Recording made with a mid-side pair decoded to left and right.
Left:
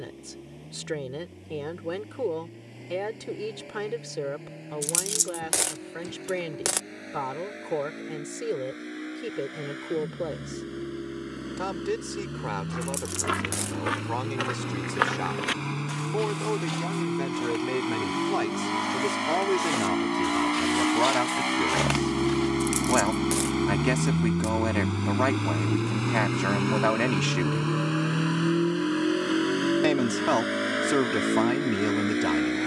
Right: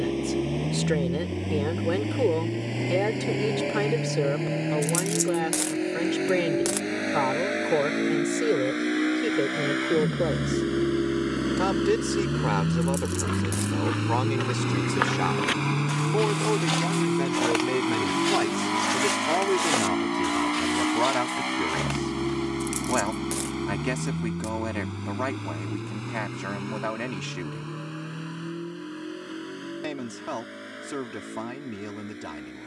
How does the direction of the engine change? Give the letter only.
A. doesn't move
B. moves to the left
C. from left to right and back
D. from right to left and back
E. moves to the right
B.